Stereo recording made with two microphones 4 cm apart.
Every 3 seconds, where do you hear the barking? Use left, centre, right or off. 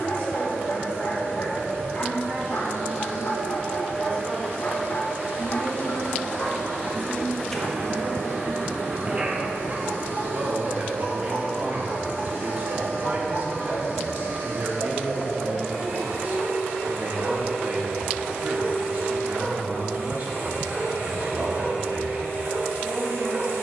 left, left, centre, right, right, right, right, right.